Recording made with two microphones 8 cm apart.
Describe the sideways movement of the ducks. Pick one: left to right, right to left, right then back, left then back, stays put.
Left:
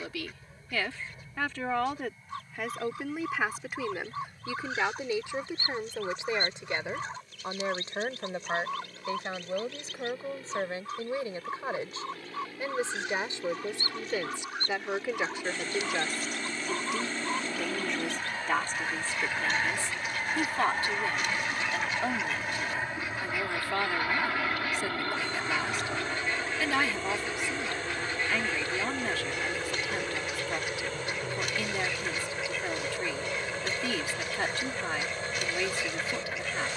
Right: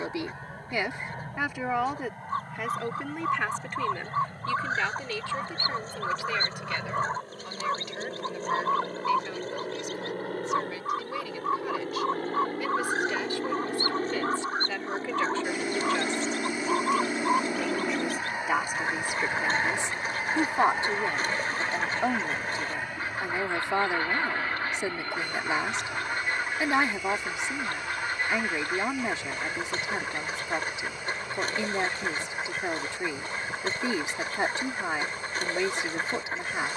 stays put.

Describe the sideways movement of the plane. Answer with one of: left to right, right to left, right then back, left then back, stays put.
right to left.